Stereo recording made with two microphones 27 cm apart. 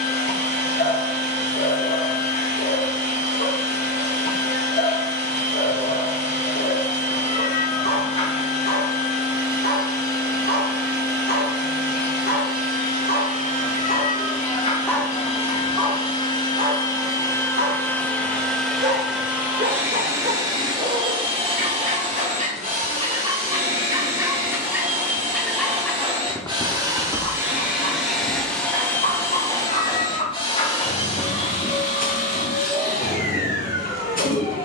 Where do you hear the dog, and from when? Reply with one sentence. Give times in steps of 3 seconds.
You can hear the dog on the left from 0 s, on the right from 15 s, in the centre from 24 s and on the left from 27 s.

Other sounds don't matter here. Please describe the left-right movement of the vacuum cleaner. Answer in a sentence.
You can hear the vacuum cleaner go right and come back.